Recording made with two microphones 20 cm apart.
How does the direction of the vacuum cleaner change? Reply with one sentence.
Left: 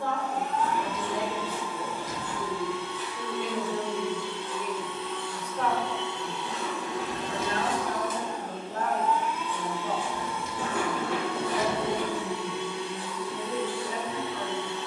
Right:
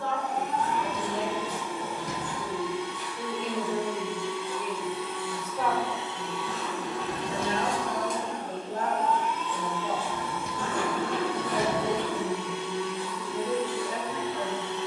In this clip you hear the vacuum cleaner move from right to left.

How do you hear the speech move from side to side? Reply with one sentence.
You can hear the speech go from the left side to the right.